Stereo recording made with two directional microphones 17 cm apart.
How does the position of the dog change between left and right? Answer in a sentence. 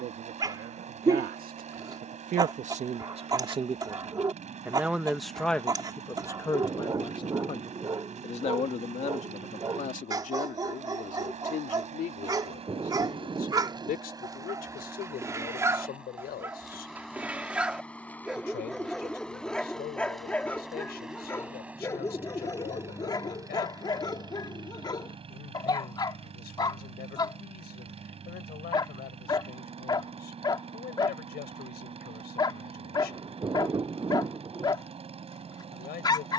In this clip you hear the dog travel towards the left.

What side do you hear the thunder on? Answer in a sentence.
You can hear the thunder on the right.